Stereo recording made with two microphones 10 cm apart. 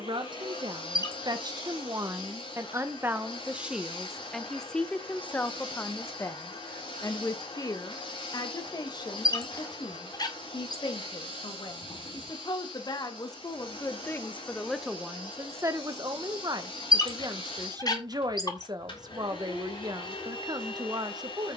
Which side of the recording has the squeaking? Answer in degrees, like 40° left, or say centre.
40° left.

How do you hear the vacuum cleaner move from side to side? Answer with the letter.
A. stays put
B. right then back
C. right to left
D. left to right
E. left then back
A.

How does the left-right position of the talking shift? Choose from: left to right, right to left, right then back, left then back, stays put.
left then back.